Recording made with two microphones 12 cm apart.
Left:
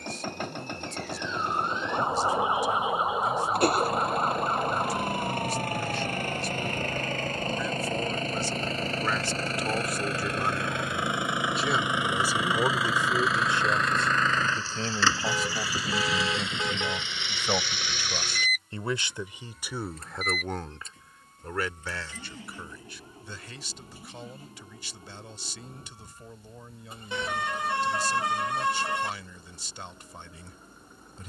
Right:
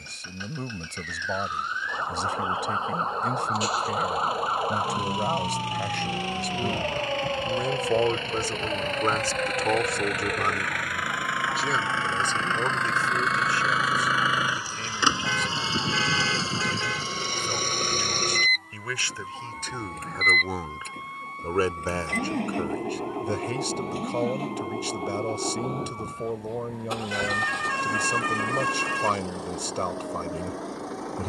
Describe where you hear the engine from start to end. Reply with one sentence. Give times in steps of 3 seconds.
You can hear the engine on the left from 0 s, in the centre from 12 s and on the right from 15 s.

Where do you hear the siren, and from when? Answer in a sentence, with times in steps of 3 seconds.
In this clip you hear the siren on the left from 0 s, in the centre from 3 s and on the right from 6 s.